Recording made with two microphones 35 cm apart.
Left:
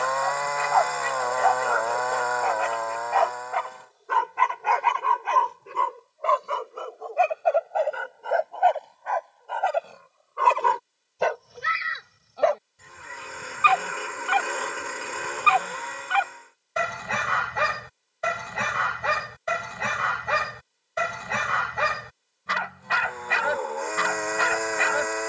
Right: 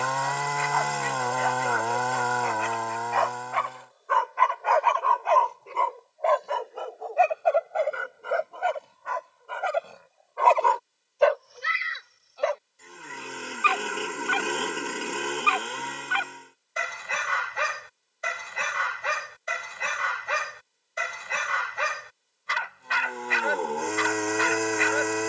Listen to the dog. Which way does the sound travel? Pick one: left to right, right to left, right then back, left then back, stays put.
right then back.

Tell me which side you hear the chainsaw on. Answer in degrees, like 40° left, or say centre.
50° right.